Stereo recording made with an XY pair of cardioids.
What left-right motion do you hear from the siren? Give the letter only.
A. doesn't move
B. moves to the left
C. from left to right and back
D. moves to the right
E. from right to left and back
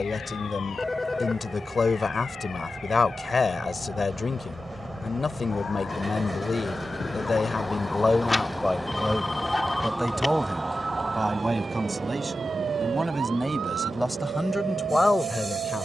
D.